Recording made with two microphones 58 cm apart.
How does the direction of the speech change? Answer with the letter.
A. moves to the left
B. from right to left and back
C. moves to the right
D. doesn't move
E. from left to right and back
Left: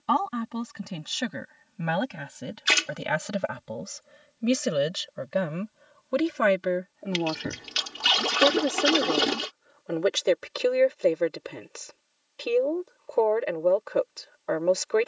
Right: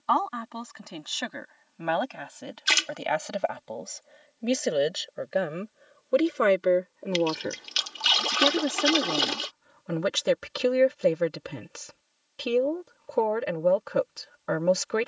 C.